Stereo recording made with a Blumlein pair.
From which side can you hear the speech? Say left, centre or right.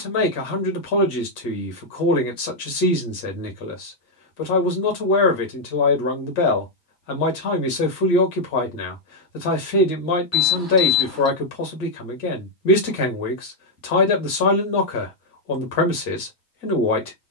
left.